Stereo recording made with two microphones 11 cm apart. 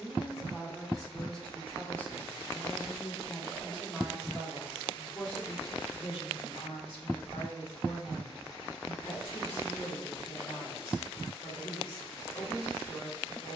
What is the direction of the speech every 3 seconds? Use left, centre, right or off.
centre, left, left, left, left.